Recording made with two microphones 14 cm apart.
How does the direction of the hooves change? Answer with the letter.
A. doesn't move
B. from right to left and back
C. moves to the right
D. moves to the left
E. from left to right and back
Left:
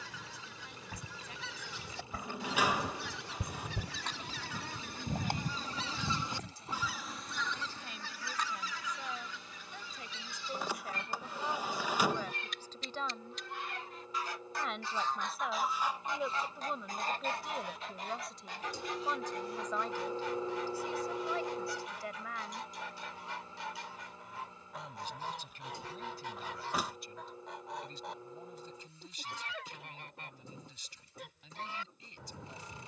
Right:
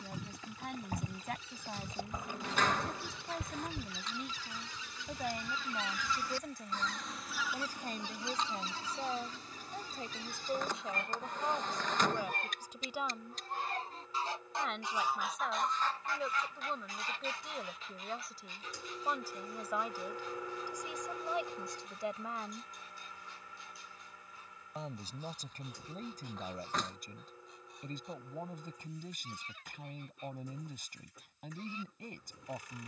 D.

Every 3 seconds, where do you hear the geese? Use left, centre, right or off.
left, left, centre, right, right, left, left, left, left, left, left.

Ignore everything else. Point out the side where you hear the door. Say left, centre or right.
centre.